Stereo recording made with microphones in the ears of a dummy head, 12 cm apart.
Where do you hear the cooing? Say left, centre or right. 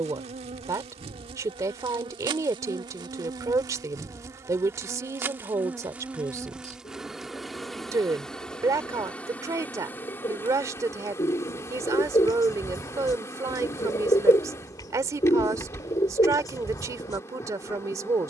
left.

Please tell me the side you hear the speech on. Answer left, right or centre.
right.